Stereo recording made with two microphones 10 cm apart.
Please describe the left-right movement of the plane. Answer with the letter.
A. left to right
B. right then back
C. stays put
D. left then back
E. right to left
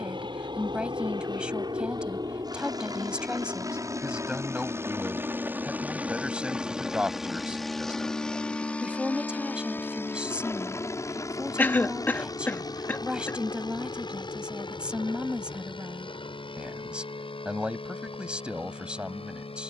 E.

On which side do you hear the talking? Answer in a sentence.
In this clip you hear the talking in the centre.